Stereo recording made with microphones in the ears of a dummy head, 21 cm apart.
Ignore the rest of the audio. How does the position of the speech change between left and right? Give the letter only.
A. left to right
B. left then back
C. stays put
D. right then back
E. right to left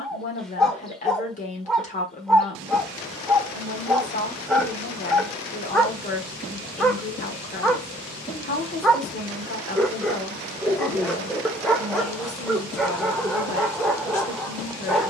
C.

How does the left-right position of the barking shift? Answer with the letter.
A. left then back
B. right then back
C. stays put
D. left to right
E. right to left
C.